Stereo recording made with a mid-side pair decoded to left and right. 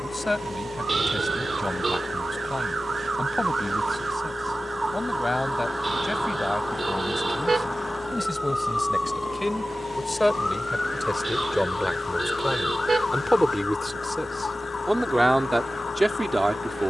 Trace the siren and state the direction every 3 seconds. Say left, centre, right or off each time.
right, right, centre, left, left, left.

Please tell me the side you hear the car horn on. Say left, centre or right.
right.